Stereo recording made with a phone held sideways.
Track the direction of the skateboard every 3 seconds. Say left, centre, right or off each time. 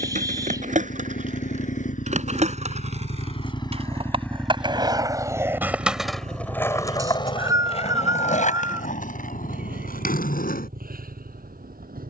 right, right, left, left.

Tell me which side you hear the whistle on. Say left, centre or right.
right.